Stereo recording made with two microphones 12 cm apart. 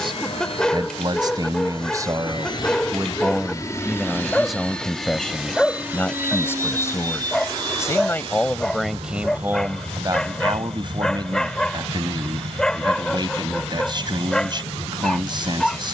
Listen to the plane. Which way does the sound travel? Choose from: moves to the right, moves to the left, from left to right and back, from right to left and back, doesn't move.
moves to the right.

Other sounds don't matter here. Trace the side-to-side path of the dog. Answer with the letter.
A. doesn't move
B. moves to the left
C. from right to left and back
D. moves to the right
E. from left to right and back
A.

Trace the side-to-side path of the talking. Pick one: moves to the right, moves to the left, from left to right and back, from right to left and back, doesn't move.
from right to left and back.